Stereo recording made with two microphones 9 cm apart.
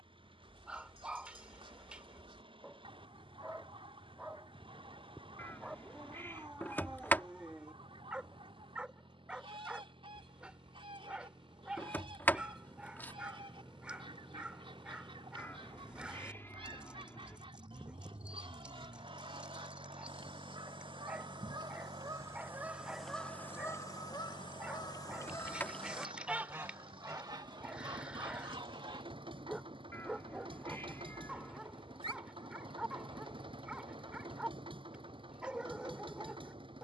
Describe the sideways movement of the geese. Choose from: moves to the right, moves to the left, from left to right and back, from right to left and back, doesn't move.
from right to left and back.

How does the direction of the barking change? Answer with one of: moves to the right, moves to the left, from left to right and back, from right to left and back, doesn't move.
doesn't move.